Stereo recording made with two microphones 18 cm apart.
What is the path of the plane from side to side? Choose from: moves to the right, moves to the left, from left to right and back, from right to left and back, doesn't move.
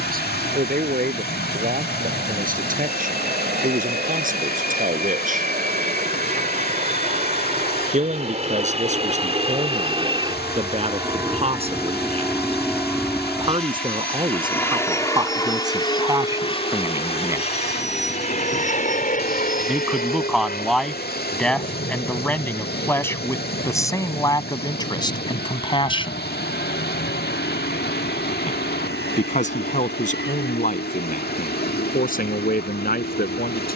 moves to the left.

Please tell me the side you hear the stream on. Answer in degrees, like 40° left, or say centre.
60° left.